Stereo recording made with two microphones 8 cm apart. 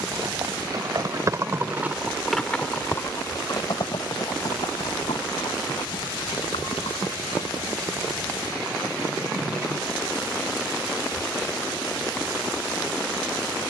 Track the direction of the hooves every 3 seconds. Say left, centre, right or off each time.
right, left, left, off, off.